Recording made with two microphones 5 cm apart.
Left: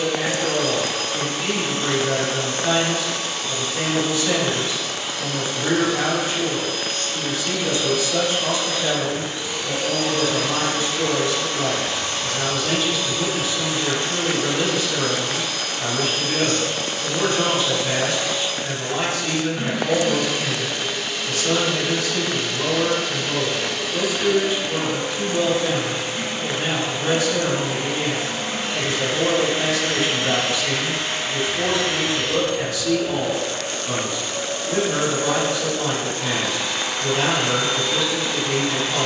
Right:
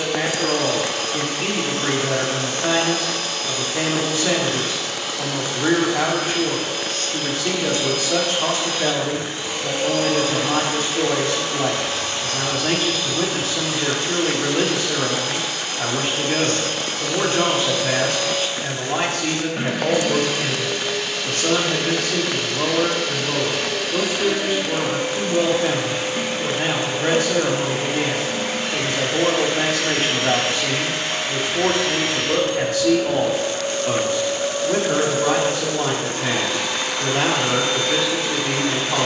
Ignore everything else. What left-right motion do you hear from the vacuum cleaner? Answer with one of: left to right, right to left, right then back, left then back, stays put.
left then back.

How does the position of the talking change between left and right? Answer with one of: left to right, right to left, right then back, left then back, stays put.
stays put.